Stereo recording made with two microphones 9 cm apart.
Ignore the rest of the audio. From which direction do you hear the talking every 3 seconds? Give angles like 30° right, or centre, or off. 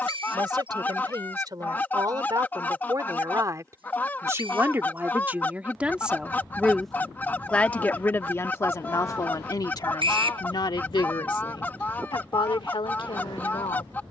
50° right, 30° right, 20° left, 50° left, 70° left.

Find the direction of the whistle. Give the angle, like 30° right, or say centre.
70° right.